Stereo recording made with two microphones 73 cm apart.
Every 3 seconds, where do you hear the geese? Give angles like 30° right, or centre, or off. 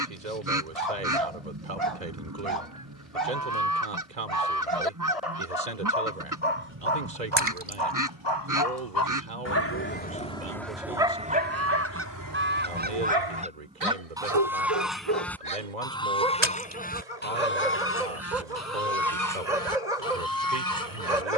30° right, 30° right, 30° right, 20° right, 10° right, 10° left, 20° left.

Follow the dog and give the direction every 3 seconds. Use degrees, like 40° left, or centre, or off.
60° left, 50° left, 40° left, centre, 40° right, 70° right, 70° right.